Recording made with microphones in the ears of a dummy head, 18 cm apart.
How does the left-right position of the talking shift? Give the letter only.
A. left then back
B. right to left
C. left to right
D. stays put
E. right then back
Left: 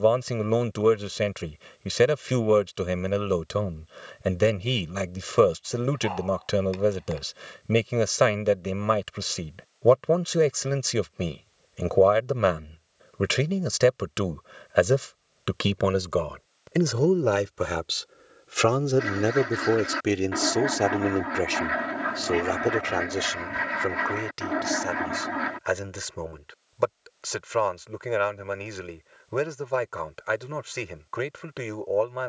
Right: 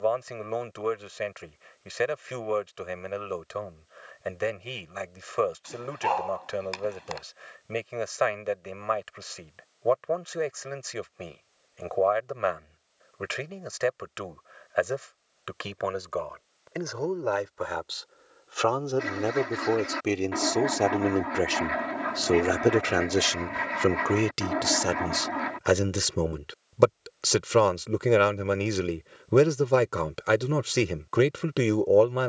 C.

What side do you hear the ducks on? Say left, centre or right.
centre.